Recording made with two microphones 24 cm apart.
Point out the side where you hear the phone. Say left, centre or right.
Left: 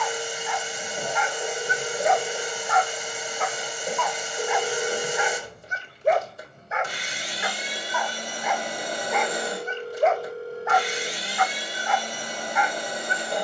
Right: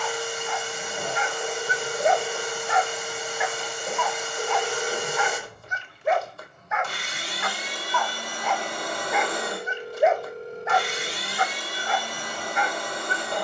centre.